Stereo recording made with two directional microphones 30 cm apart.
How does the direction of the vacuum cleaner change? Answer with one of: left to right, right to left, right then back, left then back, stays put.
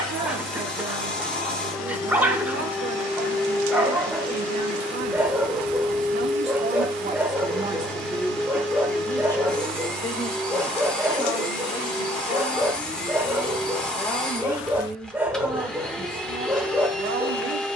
stays put.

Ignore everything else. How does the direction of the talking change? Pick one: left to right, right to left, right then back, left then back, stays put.
left then back.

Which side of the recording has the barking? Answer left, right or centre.
centre.